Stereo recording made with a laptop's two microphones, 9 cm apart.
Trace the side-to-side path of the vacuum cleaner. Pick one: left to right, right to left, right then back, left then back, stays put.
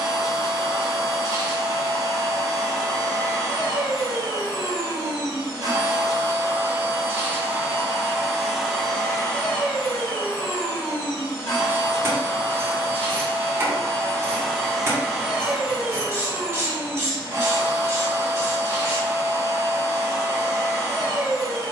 left then back.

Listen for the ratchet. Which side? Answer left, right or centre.
right.